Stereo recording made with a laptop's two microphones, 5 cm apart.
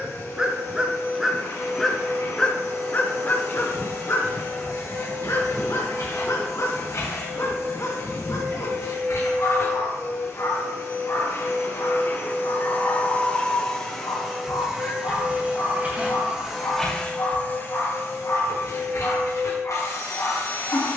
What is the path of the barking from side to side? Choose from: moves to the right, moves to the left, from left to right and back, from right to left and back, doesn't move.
moves to the left.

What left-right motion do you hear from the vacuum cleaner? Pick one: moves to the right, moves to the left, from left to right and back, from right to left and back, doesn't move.
from left to right and back.